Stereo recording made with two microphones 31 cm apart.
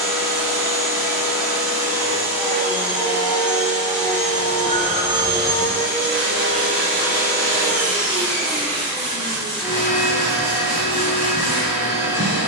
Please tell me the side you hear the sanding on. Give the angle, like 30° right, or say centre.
70° left.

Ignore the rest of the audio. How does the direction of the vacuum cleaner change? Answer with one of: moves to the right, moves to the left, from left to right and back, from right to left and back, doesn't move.
doesn't move.